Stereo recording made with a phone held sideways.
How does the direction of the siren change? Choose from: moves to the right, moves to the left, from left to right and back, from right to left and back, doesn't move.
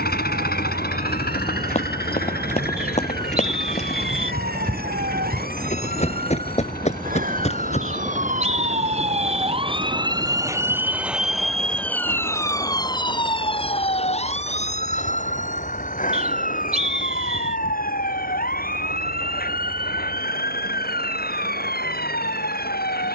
moves to the left.